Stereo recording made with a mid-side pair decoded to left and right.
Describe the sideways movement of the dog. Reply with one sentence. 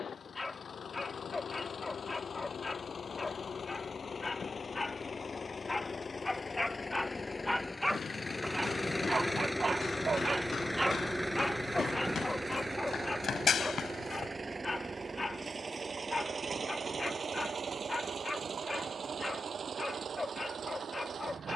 You can hear the dog go right and come back.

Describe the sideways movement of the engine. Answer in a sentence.
You can hear the engine go from the left side to the right.